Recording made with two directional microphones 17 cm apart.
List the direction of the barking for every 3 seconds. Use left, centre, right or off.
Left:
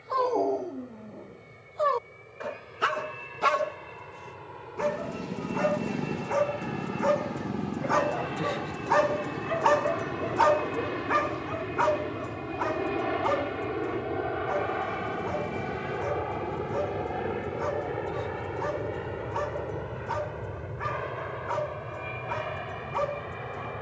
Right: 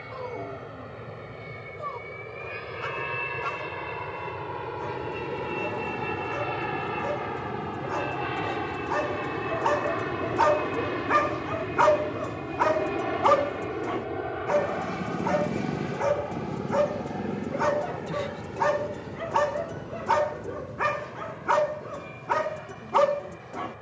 left, left, left, centre, right, right, right, right.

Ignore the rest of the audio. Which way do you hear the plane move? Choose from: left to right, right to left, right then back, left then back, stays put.
right to left.